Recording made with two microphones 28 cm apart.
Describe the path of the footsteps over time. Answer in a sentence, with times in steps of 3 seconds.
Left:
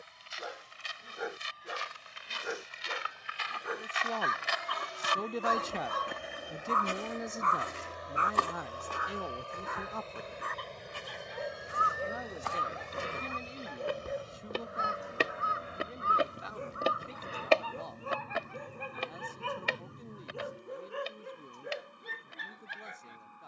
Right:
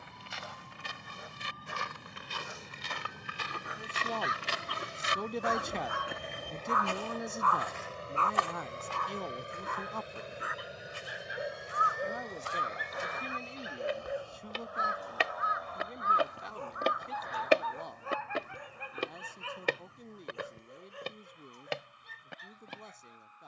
You can hear the footsteps on the right from 0 s, on the left from 6 s, in the centre from 15 s and on the right from 18 s.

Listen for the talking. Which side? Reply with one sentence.
You can hear the talking in the centre.